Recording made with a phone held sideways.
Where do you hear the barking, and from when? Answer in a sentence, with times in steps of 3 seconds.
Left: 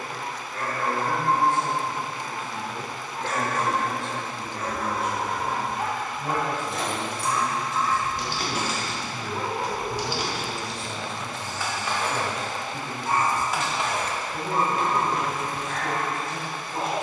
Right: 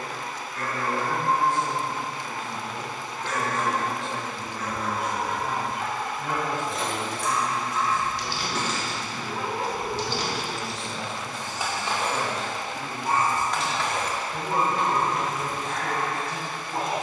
In this clip you hear the barking on the left from 0 s, in the centre from 9 s and on the right from 12 s.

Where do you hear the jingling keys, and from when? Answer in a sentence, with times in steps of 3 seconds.
In this clip you hear the jingling keys not at all from 0 s, on the left from 6 s, in the centre from 9 s and on the left from 15 s.